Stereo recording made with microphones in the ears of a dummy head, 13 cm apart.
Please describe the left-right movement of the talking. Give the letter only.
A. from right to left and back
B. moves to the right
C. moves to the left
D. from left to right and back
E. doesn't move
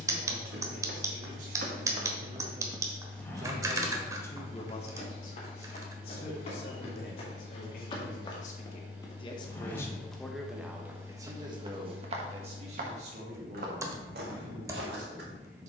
A.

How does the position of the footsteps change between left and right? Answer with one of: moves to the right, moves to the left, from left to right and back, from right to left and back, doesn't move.
from right to left and back.